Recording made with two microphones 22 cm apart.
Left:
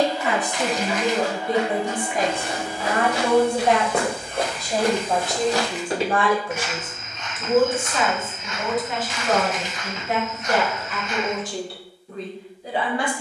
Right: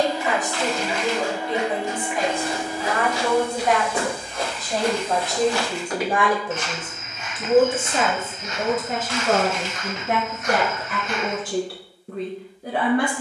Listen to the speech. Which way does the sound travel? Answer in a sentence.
In this clip you hear the speech travel towards the right.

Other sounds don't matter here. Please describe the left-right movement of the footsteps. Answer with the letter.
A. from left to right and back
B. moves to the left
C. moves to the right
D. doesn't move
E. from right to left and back
C.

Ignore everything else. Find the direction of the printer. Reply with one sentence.
In this clip you hear the printer on the right.